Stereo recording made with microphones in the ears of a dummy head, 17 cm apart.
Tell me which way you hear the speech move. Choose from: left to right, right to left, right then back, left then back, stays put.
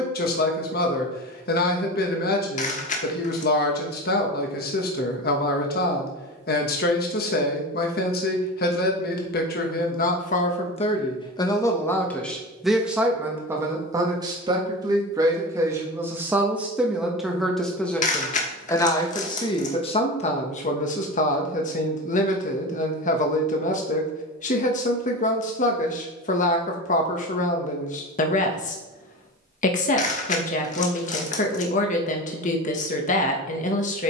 right then back.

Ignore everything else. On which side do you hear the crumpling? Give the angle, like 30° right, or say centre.
40° left.